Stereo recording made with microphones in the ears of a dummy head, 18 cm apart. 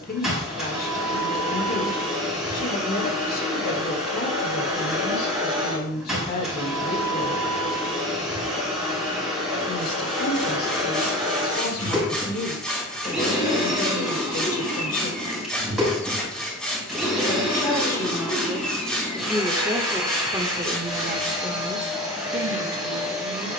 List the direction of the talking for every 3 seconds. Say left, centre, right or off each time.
left, left, left, left, left, left, centre, right.